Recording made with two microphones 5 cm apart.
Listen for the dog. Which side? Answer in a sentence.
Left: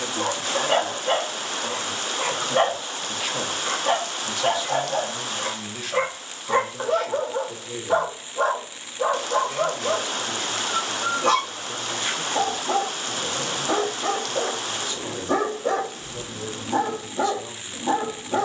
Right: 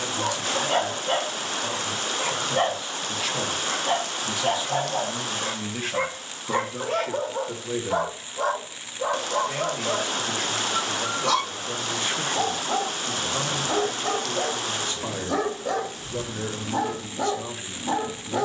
In this clip you hear the dog on the left.